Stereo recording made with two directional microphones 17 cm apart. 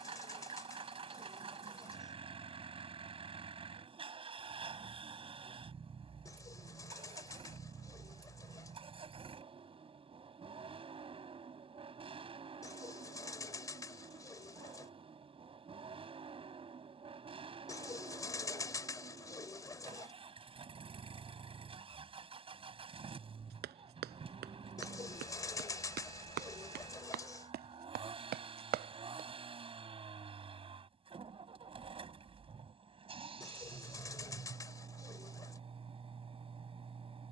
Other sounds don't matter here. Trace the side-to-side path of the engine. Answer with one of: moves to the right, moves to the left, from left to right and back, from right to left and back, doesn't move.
doesn't move.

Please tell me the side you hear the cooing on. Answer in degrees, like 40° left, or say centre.
20° left.